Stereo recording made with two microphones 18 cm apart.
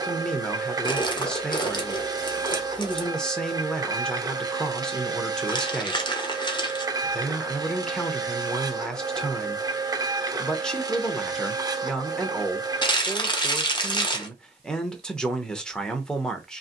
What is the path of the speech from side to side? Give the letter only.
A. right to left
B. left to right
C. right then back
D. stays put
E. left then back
D.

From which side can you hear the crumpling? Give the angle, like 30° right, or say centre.
30° left.